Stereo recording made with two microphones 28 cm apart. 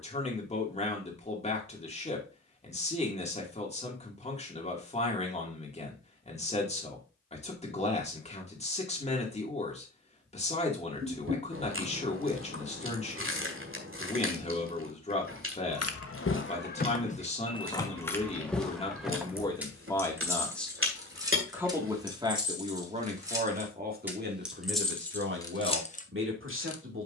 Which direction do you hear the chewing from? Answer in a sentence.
In this clip you hear the chewing on the right.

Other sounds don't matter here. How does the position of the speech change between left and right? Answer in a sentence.
You can hear the speech move from left to right.